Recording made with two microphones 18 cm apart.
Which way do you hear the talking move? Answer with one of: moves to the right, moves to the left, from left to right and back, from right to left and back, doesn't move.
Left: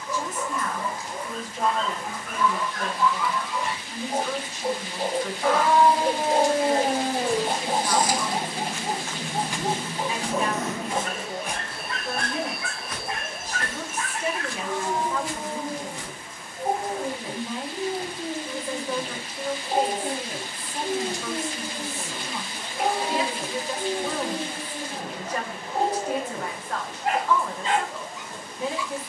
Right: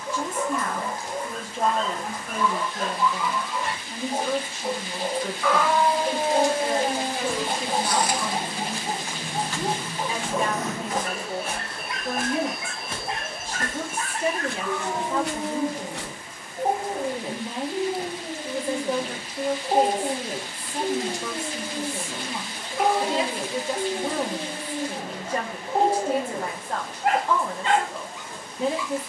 doesn't move.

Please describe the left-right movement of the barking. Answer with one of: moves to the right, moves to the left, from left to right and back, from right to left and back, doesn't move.
from right to left and back.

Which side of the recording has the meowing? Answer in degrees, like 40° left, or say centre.
40° left.